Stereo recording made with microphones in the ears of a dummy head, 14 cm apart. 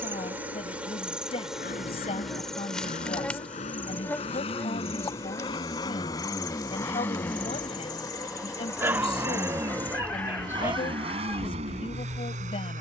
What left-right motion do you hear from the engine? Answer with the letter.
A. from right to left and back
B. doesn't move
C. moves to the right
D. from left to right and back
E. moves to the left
C.